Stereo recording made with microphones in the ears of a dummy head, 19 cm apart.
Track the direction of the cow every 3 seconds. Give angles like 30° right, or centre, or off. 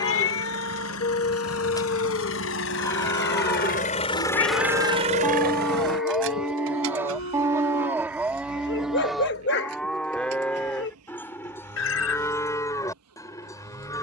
20° left, 10° left, 10° right, 10° left, 20° left.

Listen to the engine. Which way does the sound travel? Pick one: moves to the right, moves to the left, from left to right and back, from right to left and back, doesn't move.
moves to the right.